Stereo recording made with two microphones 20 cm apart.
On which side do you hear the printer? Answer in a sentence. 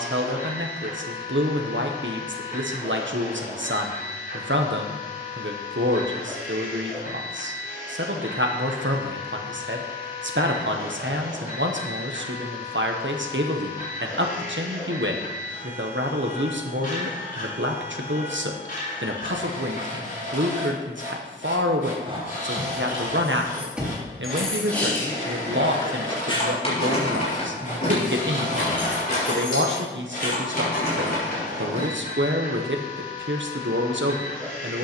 In this clip you hear the printer on the left.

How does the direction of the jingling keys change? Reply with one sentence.
You can hear the jingling keys go from the right side to the left.